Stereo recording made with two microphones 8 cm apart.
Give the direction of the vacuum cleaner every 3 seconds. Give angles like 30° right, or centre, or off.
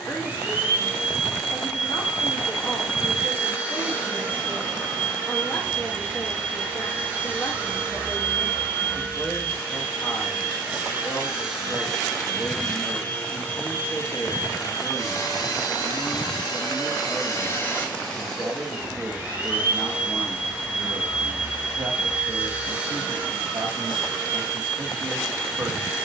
20° right, 20° right, 20° right, 10° right, 20° left, 40° left, 10° right, 20° right, 20° right.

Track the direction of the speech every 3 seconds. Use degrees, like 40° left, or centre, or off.
20° left, 20° left, 20° left, 20° left, 20° left, 20° left, centre, 40° right, 50° right.